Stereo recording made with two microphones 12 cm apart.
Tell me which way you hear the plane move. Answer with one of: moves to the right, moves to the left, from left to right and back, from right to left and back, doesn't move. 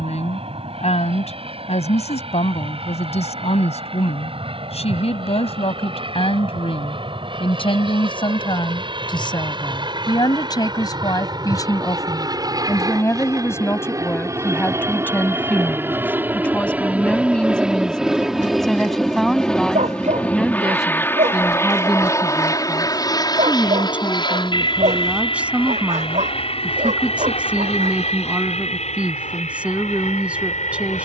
moves to the left.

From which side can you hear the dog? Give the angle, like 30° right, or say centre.
80° right.